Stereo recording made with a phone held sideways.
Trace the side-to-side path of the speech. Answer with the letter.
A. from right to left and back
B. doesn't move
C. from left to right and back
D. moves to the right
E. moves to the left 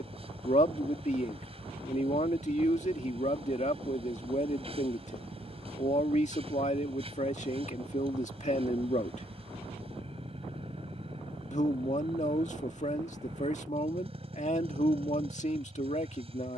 B.